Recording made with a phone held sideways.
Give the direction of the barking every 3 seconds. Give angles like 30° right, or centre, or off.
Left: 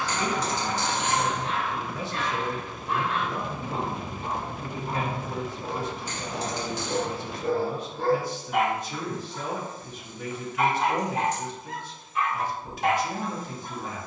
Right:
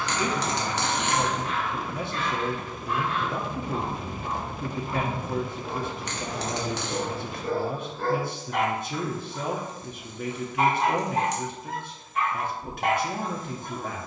30° left, 30° left, 20° left, 30° right, 50° right.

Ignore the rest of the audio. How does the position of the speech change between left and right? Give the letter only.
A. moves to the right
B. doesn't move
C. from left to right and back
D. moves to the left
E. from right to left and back
B.